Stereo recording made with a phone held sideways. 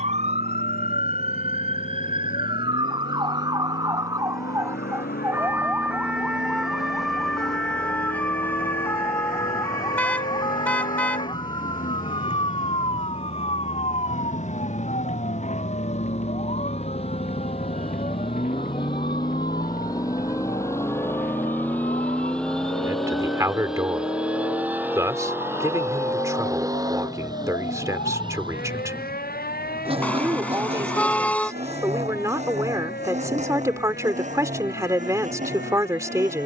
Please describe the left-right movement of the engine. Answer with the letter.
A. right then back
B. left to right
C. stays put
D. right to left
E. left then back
B.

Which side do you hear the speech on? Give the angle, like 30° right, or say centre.
20° right.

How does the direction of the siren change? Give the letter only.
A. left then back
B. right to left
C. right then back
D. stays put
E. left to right
B.